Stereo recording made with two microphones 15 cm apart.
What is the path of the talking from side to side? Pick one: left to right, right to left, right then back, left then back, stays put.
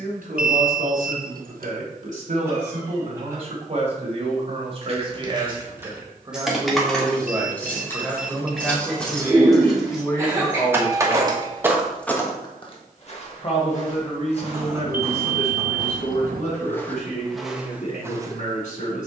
right to left.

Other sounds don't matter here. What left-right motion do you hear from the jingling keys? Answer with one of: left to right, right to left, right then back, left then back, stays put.
left then back.